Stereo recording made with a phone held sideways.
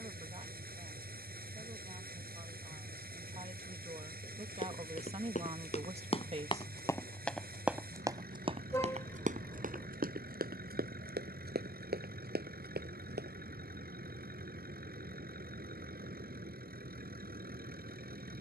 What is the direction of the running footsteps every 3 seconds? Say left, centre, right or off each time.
off, left, centre, right, right, off.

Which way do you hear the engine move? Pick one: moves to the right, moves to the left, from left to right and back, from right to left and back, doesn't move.
doesn't move.